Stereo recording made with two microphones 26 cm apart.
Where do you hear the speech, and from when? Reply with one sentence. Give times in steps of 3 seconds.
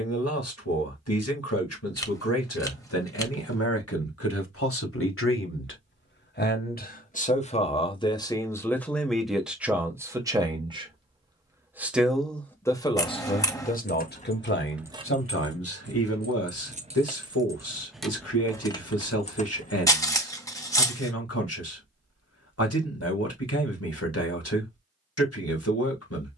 You can hear the speech on the left from 0 s, in the centre from 9 s and on the left from 12 s.